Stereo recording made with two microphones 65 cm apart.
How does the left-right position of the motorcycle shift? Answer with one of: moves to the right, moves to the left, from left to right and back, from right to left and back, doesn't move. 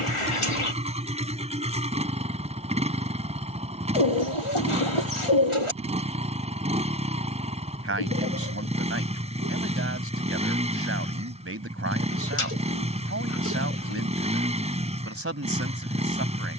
doesn't move.